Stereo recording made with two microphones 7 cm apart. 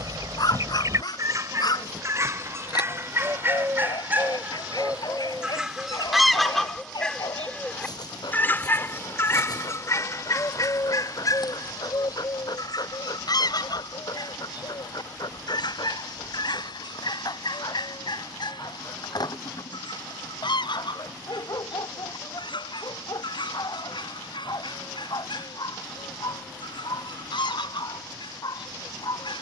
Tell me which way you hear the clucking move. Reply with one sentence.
In this clip you hear the clucking move from right to left.